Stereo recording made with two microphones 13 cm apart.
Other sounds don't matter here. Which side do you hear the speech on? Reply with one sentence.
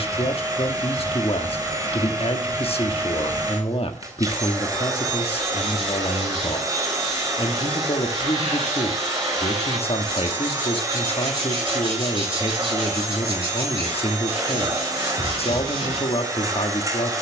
In this clip you hear the speech on the left.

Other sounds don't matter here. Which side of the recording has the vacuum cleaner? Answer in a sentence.
You can hear the vacuum cleaner on the right.